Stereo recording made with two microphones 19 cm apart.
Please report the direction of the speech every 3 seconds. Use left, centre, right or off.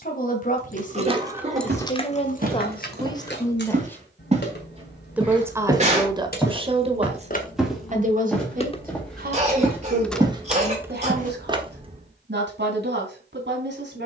left, centre, right, right, right.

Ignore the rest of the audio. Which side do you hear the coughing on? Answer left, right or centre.
right.